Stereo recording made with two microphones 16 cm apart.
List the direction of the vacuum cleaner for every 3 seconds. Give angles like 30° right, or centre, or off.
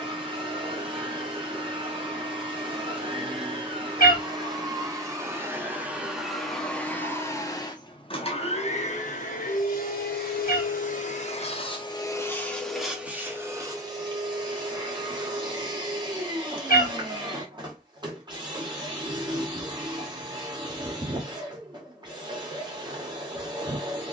30° right, 20° right, 20° left, 50° left, 10° right, 30° right, 30° right, 30° right.